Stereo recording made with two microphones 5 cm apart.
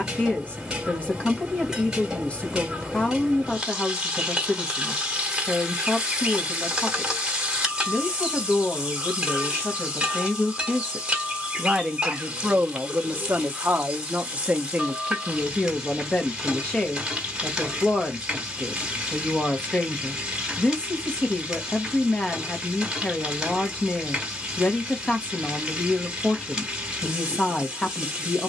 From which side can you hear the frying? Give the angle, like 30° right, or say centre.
10° right.